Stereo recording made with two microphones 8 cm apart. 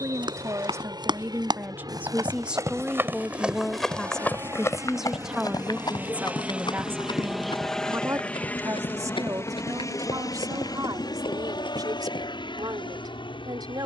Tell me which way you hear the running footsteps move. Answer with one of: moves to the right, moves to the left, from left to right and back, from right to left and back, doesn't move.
moves to the left.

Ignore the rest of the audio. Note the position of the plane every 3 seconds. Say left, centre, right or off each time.
right, right, centre, left, left.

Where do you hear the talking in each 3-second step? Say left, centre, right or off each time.
right, centre, right, right, right.